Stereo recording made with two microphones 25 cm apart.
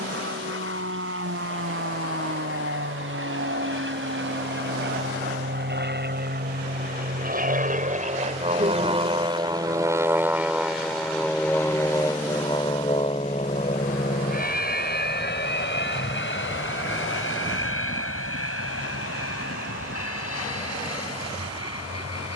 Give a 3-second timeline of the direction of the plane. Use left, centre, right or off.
right, right, right, centre, left, left, left, left.